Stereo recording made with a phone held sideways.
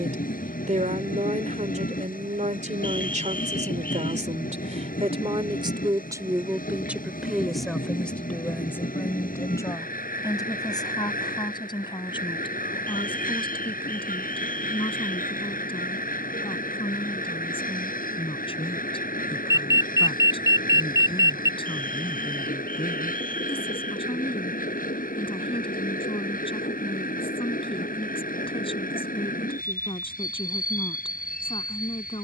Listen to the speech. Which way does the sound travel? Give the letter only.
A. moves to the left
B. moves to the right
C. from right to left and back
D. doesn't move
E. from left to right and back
A.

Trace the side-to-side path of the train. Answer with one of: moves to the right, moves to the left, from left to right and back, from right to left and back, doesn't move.
doesn't move.